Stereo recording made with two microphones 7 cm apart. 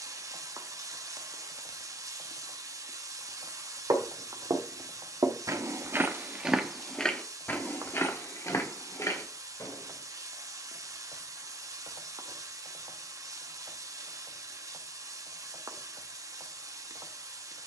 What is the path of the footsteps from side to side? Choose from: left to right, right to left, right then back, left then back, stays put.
right to left.